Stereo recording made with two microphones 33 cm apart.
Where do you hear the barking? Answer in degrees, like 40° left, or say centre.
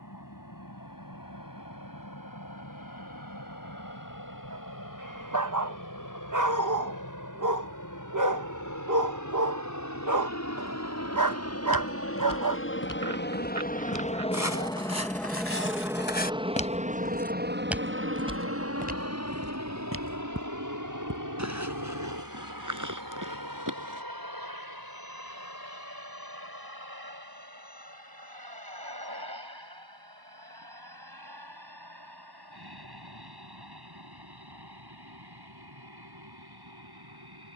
60° right.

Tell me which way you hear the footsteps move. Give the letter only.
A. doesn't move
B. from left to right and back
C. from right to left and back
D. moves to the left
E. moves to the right
E.